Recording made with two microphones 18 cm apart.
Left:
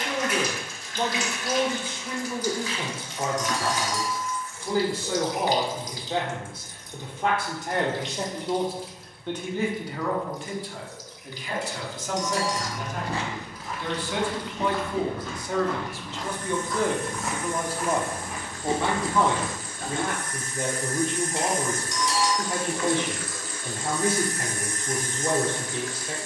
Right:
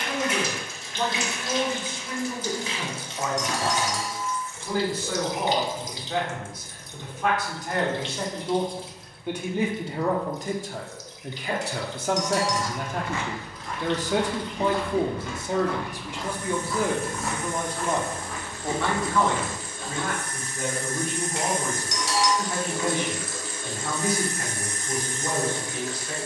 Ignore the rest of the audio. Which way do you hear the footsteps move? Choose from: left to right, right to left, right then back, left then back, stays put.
right then back.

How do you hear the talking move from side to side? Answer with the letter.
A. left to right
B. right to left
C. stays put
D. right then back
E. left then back
D.